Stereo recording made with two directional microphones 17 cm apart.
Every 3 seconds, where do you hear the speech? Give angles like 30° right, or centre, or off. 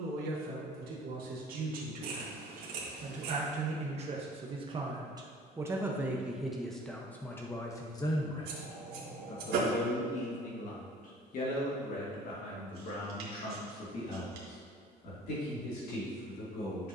60° right, 30° right, 10° left, 50° left, 60° left, 70° left.